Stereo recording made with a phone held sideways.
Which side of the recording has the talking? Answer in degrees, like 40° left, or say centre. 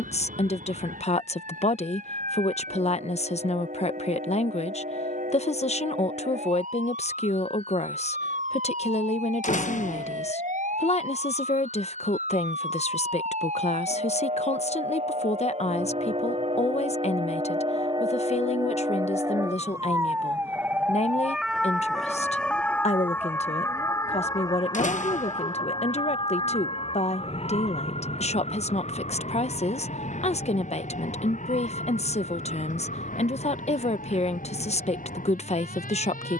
50° left.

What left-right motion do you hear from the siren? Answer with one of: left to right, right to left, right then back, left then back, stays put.
right to left.